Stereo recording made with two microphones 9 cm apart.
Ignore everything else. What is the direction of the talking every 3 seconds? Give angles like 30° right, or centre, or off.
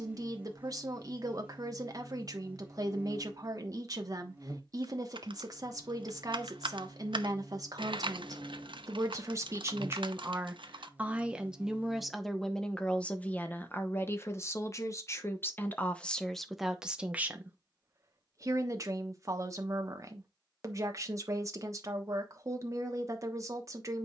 50° right, 50° right, 50° right, 20° right, 20° left, centre, 40° right, 40° right.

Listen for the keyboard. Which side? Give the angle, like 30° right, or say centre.
70° right.